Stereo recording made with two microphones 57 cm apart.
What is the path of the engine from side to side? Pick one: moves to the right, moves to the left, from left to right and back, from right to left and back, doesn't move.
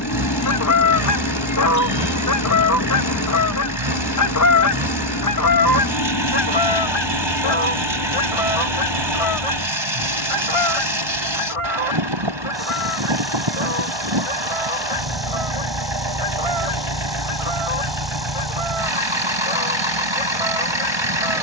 doesn't move.